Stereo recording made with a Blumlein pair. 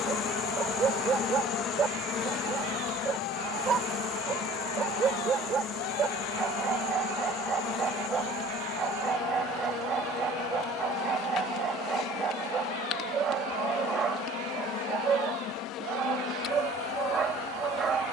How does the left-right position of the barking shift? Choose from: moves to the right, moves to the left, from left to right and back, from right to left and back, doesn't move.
doesn't move.